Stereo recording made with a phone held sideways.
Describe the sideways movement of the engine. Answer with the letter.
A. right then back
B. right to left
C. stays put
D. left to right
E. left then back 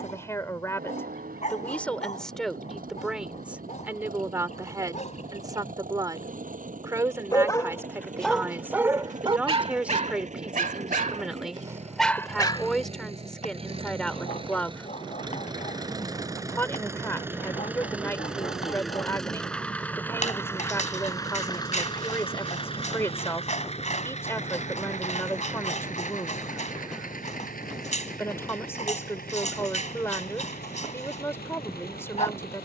B.